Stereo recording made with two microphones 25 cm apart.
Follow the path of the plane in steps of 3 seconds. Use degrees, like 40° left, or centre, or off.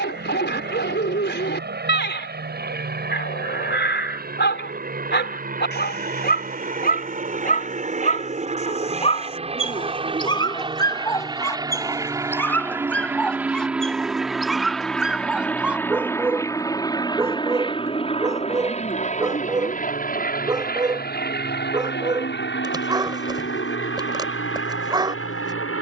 50° right, 40° right, 30° right, 20° right, 10° right, 10° left, 30° left, 50° left, 60° left.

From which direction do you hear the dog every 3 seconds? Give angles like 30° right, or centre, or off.
50° left, 50° left, 40° left, 20° left, centre, 10° right, 20° right, 20° right, 20° right.